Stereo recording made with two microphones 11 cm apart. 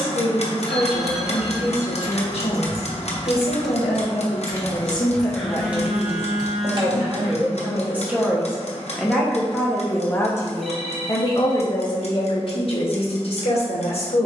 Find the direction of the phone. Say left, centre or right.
centre.